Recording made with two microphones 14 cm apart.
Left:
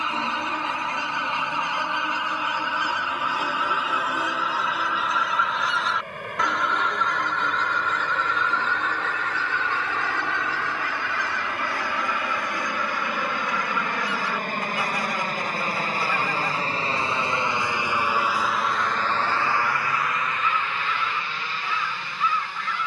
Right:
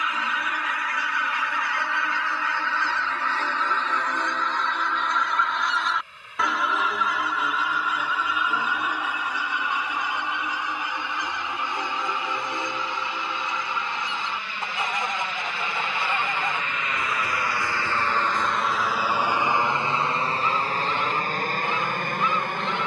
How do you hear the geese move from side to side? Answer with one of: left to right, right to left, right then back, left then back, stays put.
left to right.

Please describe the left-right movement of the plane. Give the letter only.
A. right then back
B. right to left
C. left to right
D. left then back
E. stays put
C.